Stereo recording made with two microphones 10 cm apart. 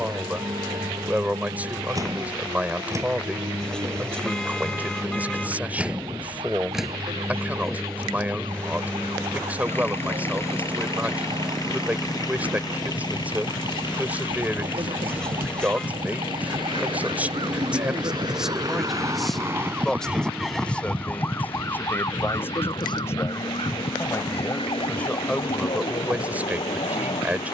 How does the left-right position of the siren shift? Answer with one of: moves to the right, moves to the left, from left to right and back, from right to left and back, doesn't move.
moves to the left.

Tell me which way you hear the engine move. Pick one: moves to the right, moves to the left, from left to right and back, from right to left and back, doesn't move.
moves to the left.